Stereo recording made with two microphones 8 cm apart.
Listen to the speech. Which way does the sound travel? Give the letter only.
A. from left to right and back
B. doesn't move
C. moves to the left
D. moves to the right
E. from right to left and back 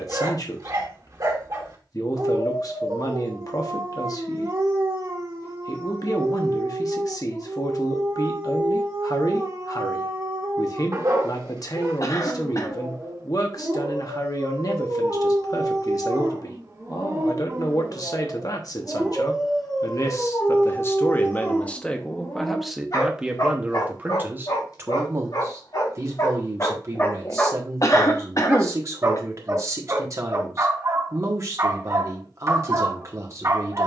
D.